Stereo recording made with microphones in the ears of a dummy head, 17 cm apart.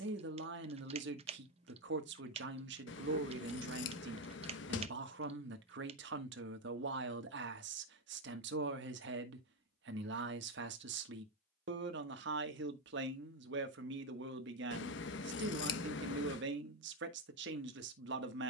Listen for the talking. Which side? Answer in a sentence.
In this clip you hear the talking on the right.